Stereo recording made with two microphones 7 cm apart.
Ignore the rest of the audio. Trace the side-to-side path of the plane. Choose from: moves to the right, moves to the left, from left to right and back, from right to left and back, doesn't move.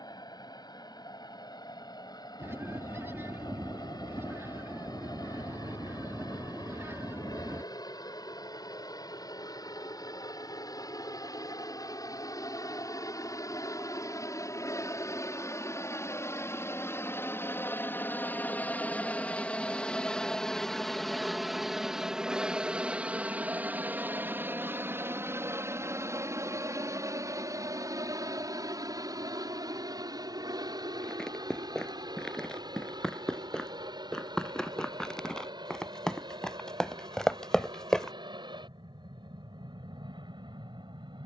moves to the right.